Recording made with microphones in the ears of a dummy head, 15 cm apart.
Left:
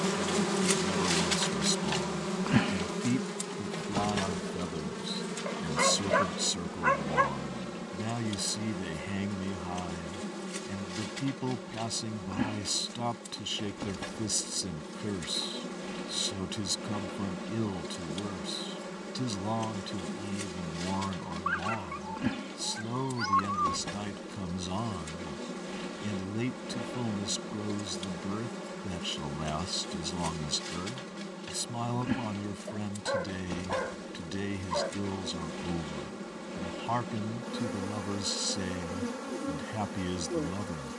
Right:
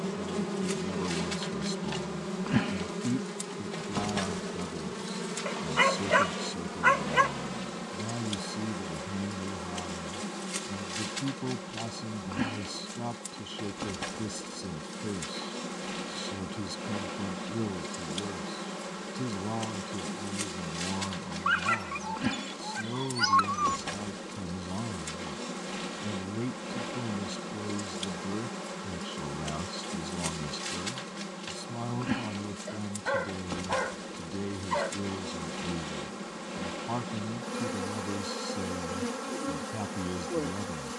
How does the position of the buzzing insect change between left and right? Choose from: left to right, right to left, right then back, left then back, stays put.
left to right.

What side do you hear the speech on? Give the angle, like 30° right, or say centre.
50° left.